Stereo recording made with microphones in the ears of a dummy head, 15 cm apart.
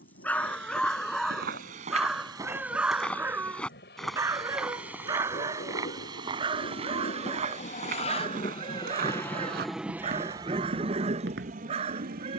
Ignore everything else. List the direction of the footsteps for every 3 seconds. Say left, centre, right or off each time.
right, centre, right, right.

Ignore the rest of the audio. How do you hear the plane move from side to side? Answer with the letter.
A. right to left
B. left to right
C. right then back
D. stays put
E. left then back
B.